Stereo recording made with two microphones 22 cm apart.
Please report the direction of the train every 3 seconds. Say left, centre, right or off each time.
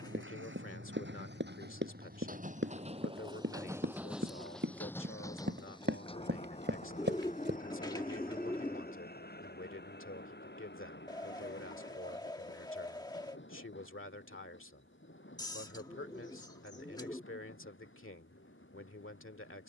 right, centre, left, left, left, left, left.